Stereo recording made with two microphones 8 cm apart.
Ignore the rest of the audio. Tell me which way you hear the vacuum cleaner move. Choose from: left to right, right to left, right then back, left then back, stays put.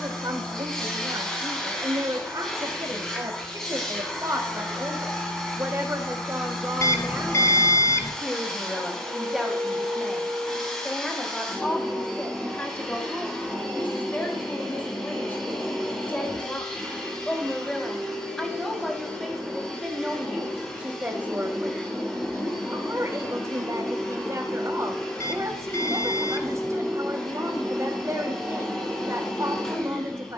stays put.